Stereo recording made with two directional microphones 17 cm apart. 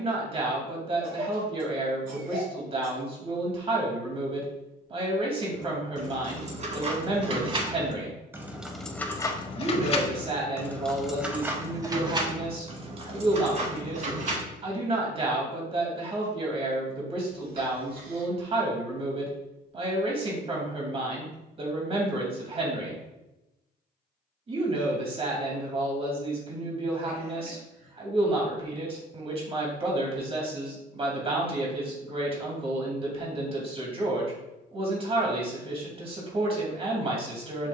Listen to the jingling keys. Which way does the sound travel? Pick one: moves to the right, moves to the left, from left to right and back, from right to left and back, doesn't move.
from right to left and back.